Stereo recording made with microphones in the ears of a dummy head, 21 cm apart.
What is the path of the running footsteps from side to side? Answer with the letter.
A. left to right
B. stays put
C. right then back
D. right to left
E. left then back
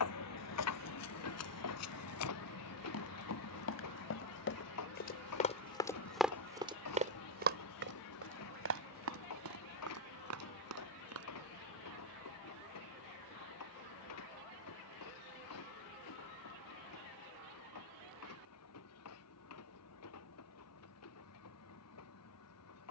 A.